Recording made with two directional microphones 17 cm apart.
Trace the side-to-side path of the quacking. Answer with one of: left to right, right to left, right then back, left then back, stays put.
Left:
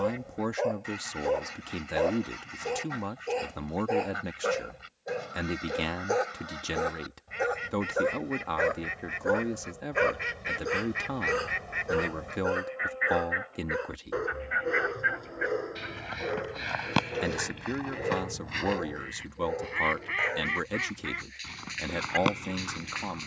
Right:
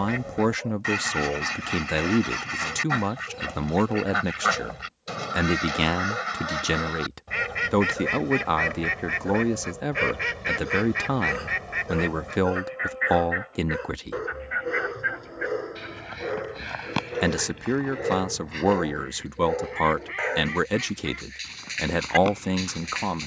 right to left.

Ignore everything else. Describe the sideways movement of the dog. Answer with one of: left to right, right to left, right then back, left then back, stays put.
left to right.